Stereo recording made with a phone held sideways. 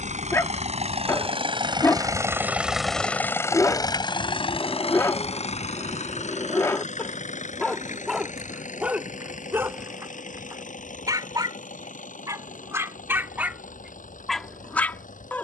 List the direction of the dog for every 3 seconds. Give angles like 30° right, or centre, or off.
20° left, 20° left, 10° left, 20° right, 10° right.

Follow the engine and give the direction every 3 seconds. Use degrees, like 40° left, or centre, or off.
40° right, 40° left, 70° left, 70° left, 80° left.